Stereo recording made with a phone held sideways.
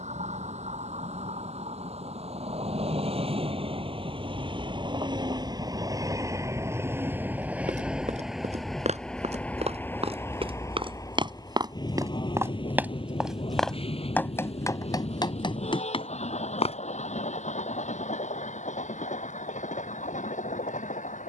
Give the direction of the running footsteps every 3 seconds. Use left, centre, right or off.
off, off, right, right, centre, left, off.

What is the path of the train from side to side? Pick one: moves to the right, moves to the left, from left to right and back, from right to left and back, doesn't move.
moves to the left.